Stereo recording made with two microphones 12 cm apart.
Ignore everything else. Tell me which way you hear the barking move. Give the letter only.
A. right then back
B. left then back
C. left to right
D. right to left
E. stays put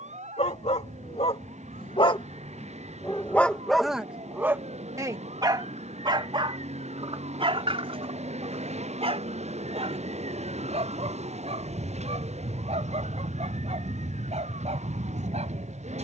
C.